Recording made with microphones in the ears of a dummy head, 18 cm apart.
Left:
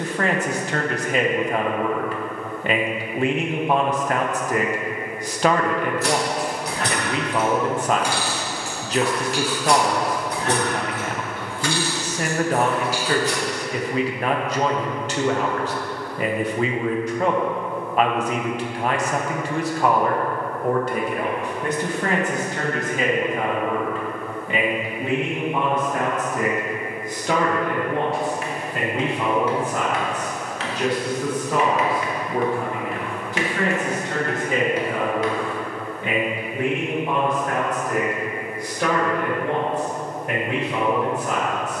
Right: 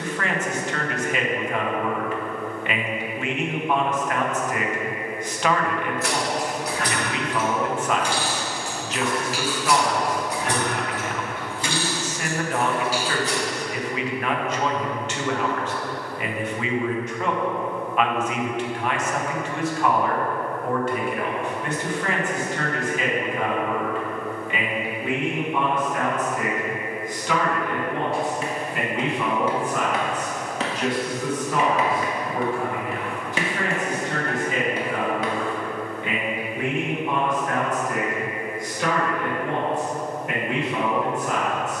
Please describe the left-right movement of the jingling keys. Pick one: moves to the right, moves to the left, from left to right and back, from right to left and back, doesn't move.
moves to the right.